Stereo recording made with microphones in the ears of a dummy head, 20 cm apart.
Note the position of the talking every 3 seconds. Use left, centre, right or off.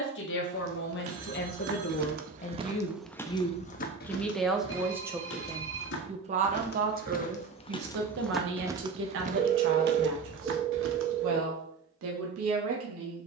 left, centre, right, right, right.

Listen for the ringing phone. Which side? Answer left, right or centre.
right.